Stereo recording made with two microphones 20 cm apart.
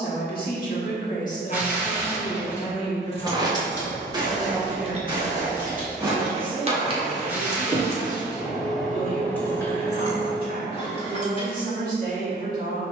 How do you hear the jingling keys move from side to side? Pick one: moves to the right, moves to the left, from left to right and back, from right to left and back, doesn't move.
from left to right and back.